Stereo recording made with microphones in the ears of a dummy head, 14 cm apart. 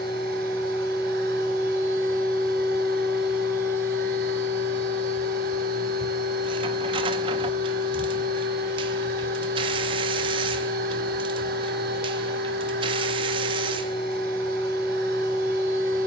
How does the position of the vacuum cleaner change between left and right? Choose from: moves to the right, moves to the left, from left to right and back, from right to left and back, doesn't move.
doesn't move.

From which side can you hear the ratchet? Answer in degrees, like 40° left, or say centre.
30° right.